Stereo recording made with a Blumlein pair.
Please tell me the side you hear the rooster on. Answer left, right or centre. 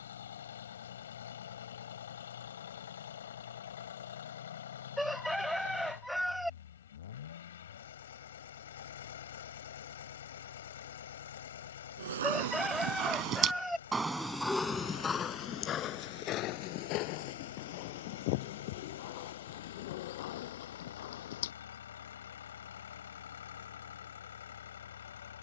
centre.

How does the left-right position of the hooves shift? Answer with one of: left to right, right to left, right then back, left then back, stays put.
right to left.